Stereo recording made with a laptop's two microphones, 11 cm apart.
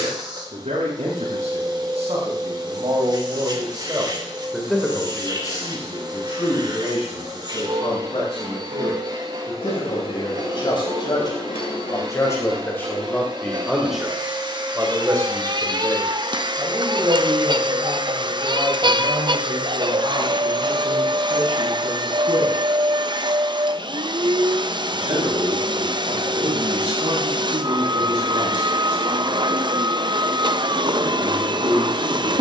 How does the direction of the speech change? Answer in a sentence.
In this clip you hear the speech move from right to left and back again.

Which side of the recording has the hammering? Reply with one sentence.
In this clip you hear the hammering on the left.